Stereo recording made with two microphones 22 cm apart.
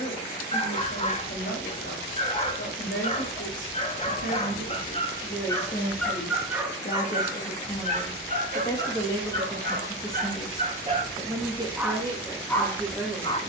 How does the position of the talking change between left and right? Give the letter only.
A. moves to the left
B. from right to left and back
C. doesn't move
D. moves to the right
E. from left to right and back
D.